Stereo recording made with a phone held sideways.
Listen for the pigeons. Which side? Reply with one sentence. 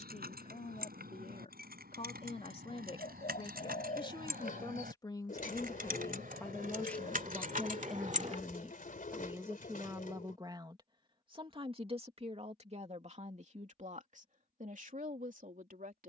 In this clip you hear the pigeons on the left.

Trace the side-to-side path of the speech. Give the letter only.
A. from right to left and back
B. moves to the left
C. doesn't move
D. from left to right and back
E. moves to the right
E.